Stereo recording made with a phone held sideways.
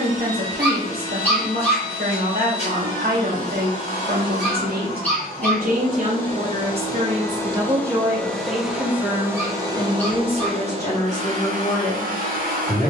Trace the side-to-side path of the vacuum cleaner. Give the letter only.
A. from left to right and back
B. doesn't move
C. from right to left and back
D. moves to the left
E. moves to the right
E.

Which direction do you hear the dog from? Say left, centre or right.
centre.